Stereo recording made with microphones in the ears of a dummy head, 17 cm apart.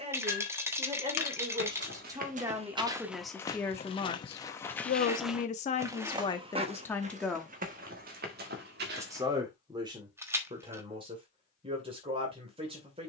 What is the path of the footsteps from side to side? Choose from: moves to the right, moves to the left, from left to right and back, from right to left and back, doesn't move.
from right to left and back.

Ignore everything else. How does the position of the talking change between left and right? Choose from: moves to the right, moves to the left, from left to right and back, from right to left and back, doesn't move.
from right to left and back.